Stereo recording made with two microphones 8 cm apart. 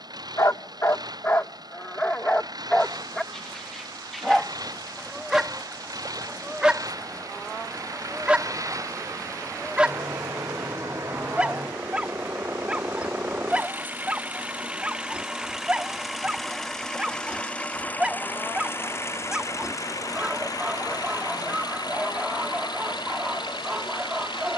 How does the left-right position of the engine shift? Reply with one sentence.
In this clip you hear the engine move to the left.